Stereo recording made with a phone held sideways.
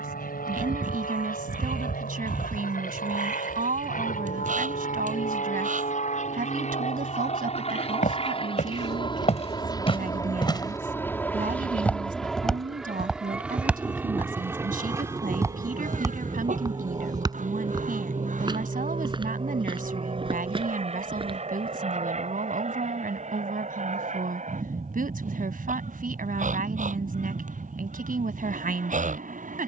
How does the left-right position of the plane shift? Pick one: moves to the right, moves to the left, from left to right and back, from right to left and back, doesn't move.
moves to the right.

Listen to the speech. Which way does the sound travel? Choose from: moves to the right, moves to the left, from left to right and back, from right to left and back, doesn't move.
doesn't move.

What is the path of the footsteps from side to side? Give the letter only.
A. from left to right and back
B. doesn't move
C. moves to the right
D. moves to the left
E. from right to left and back
C.